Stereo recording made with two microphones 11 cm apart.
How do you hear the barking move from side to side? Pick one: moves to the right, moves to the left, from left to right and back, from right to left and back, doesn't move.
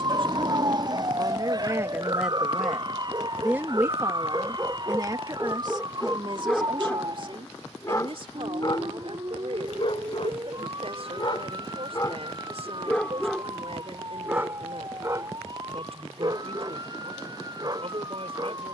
from right to left and back.